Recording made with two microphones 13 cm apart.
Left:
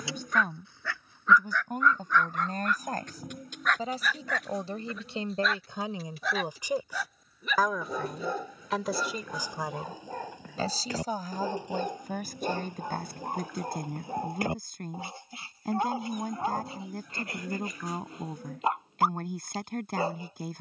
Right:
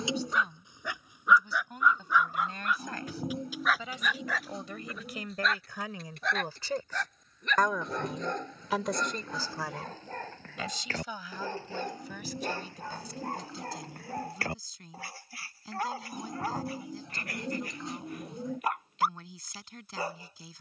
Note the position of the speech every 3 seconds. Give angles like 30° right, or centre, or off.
40° left, 30° left, 10° left, 30° left, 50° left, 50° left, 50° left.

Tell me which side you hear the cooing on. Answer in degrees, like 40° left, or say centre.
30° right.